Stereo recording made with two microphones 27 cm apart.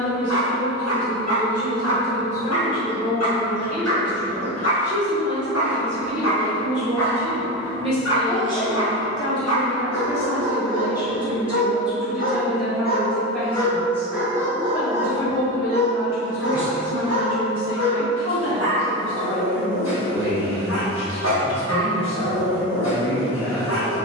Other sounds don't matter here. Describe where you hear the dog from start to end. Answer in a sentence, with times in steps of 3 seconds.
In this clip you hear the dog on the left from 0 s, in the centre from 12 s and on the left from 15 s.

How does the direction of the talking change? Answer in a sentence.
In this clip you hear the talking move to the left.